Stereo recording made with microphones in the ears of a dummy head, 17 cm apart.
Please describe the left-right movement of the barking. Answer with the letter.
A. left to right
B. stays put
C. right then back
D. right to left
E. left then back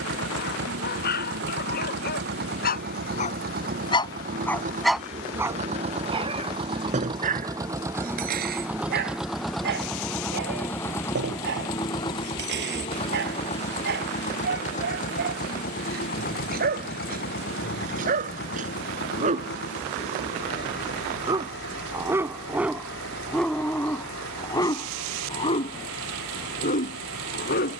C.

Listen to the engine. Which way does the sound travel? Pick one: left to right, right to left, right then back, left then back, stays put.
right to left.